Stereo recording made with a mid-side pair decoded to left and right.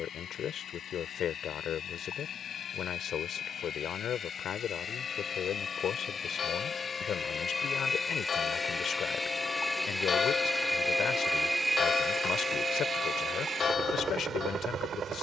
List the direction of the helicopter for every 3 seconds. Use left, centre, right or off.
left, left, left, centre, right.